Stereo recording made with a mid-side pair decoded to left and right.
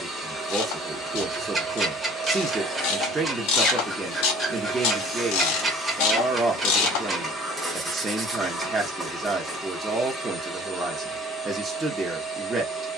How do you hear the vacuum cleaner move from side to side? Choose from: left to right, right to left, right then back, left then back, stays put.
stays put.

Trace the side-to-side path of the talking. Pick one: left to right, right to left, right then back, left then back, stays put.
stays put.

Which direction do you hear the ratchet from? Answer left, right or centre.
left.